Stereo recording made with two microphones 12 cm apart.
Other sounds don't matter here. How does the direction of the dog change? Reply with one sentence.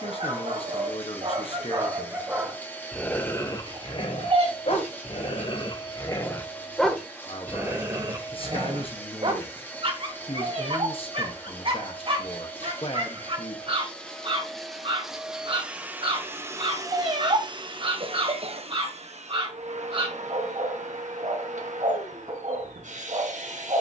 You can hear the dog move from right to left and back again.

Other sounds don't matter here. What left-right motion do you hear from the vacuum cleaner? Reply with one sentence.
In this clip you hear the vacuum cleaner move to the right.